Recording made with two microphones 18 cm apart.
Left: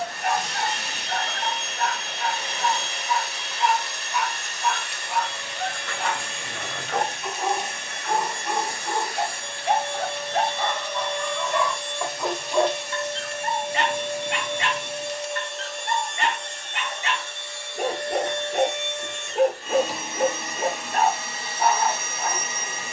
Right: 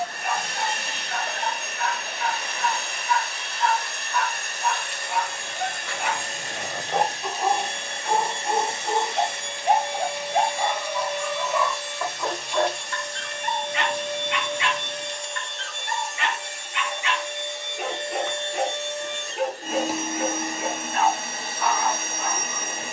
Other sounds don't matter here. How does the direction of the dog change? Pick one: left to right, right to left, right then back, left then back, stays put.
right then back.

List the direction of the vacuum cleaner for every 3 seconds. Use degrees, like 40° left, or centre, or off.
50° right, 50° right, 30° right, 10° right, 10° left, 10° right, 40° right, 50° right.